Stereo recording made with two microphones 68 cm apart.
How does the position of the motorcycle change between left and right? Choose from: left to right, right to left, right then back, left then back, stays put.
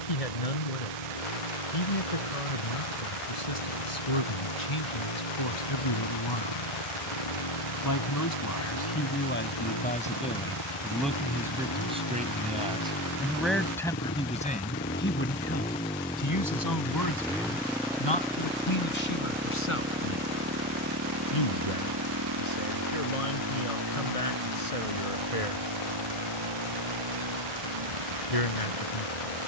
left to right.